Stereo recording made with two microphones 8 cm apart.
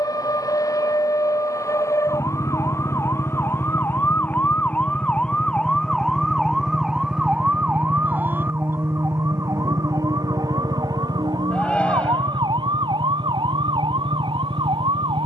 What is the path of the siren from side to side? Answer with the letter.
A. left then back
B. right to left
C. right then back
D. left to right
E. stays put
D.